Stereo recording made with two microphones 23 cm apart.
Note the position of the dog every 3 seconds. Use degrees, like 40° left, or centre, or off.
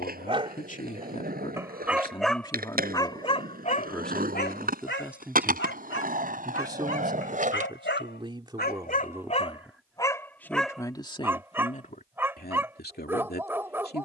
10° right, 40° left, 60° left, 10° left, 10° right.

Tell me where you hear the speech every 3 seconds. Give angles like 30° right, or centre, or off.
30° left, centre, 20° right, 10° left, 40° left.